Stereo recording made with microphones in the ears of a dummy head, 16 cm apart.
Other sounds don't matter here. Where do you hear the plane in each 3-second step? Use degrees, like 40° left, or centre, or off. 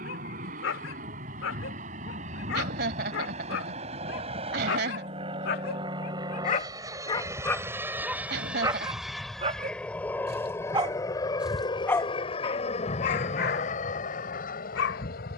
50° right, 30° right, 10° right, 10° left, 40° left.